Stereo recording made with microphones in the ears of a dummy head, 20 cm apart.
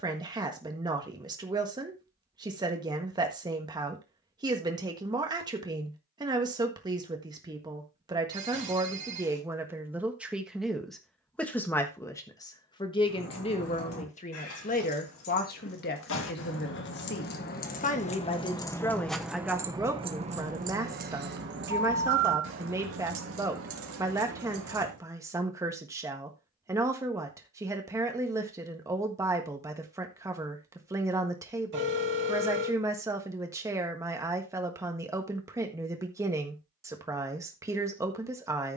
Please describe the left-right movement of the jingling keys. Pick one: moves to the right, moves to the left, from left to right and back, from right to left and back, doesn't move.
moves to the right.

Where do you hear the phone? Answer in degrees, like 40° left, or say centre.
50° right.